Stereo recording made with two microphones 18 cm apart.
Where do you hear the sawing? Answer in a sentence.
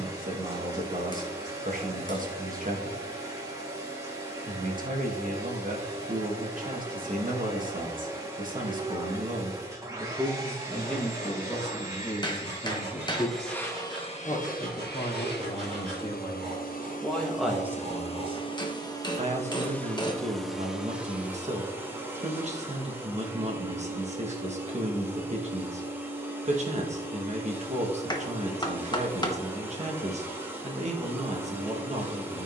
In this clip you hear the sawing on the right.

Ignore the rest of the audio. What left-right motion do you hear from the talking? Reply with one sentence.
You can hear the talking move from right to left and back again.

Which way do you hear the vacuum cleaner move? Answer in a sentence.
You can hear the vacuum cleaner go left and come back.